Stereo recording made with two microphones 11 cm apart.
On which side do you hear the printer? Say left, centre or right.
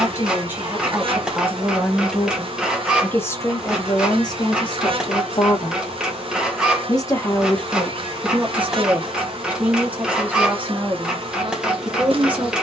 centre.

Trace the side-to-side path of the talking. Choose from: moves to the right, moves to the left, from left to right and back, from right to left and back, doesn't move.
from right to left and back.